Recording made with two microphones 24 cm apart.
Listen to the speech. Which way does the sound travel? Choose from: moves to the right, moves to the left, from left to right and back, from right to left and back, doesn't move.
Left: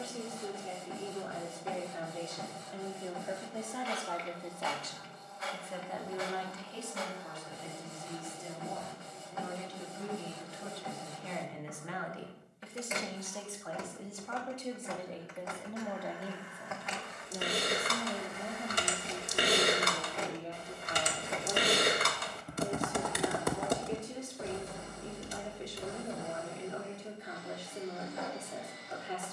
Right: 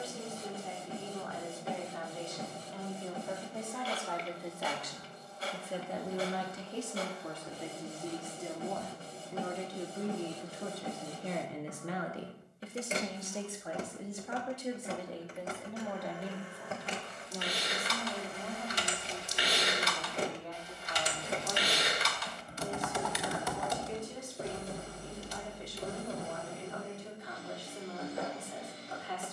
from left to right and back.